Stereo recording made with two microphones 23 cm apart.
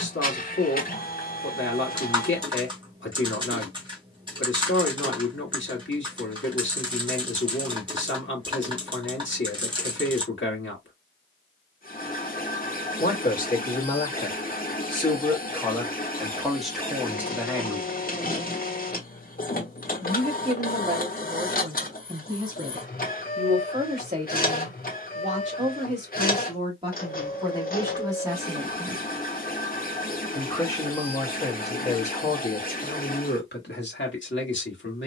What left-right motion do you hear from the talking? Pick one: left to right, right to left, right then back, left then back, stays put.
right then back.